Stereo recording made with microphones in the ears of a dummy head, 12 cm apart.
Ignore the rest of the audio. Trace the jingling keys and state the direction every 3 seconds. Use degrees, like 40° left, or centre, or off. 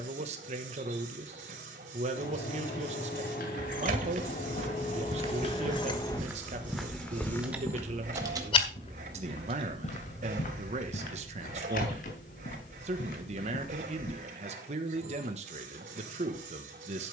70° left, 60° left, 10° right, 40° right, off, off.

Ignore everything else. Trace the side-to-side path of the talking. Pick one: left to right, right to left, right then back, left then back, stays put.
stays put.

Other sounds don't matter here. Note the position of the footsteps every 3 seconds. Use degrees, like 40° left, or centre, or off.
off, 50° right, 20° left, 60° left, 70° left, off.